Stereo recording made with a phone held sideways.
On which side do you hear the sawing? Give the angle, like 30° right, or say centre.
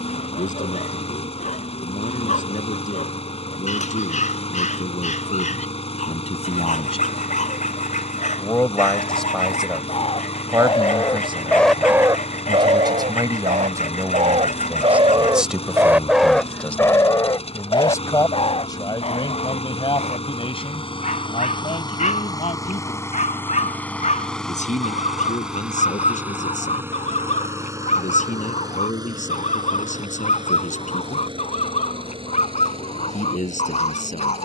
60° left.